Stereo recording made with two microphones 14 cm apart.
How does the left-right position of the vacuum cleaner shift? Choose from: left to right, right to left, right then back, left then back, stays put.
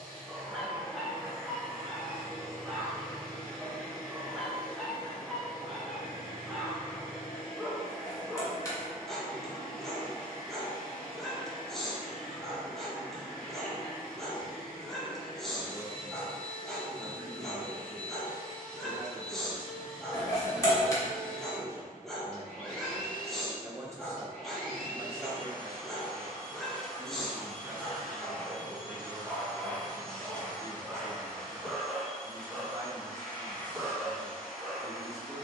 stays put.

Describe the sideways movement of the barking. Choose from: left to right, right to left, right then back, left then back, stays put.
stays put.